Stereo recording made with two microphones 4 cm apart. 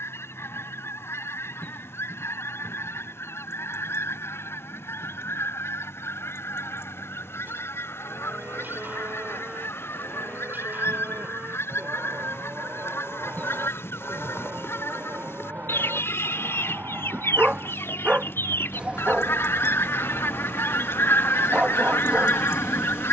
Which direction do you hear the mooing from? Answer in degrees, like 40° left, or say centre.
50° right.